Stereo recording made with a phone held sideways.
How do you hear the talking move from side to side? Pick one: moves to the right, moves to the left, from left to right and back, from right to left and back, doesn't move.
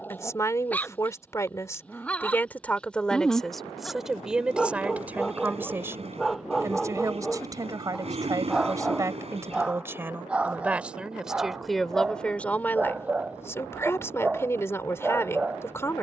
from left to right and back.